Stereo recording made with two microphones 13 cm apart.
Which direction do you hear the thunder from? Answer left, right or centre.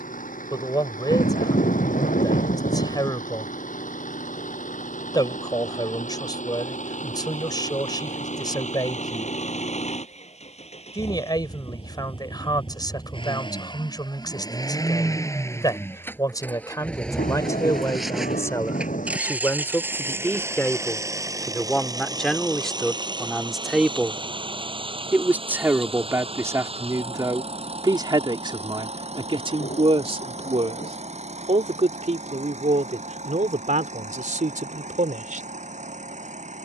left.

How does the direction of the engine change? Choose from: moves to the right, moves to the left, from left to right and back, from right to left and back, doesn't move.
moves to the right.